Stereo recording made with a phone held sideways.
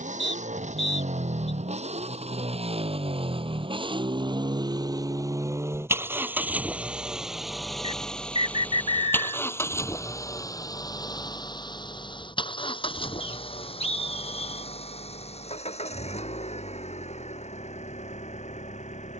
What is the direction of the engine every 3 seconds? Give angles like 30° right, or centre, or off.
50° right, 30° right, centre, 20° left, 40° left, 50° left, 50° left.